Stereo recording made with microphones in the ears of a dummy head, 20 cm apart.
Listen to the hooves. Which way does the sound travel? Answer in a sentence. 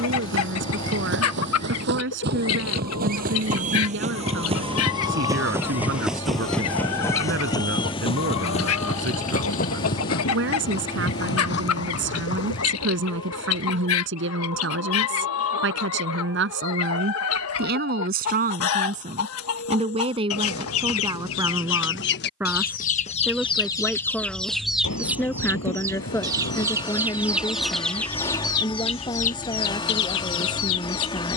In this clip you hear the hooves move to the left.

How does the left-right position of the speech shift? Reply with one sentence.
You can hear the speech go from the right side to the left.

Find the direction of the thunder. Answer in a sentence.
In this clip you hear the thunder on the left.